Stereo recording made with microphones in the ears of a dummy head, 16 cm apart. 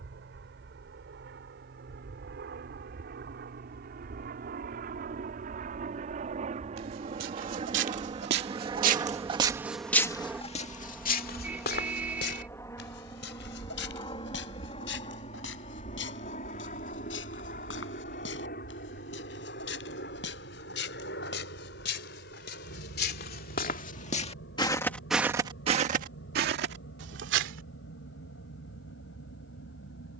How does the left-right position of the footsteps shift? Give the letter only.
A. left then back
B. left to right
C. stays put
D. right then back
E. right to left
A.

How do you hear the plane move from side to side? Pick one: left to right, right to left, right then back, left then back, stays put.
right to left.